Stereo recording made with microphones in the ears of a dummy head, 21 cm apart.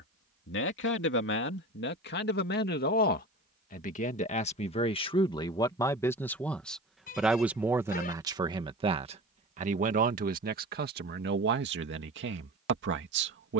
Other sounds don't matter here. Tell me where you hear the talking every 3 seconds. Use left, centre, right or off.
left, left, centre, right, right.